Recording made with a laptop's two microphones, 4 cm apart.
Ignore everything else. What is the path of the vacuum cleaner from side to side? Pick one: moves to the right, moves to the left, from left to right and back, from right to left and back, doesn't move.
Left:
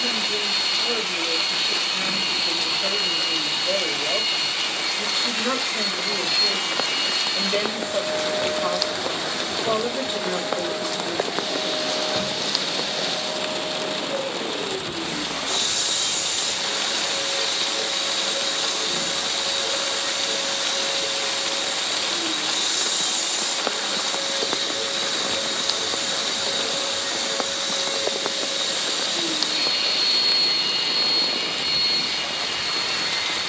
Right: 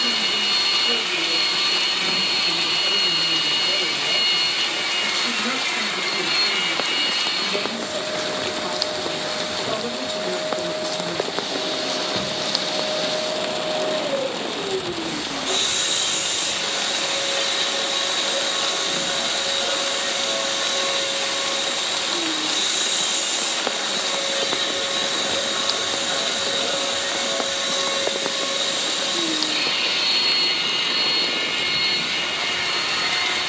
from right to left and back.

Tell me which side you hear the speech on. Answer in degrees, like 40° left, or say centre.
30° left.